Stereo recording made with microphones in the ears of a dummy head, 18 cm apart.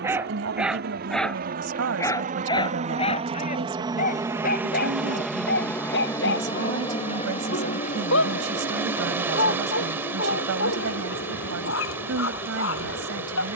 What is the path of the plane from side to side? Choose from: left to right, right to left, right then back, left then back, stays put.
right to left.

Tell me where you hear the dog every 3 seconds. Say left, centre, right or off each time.
centre, left, left, left, left.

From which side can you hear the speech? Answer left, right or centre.
right.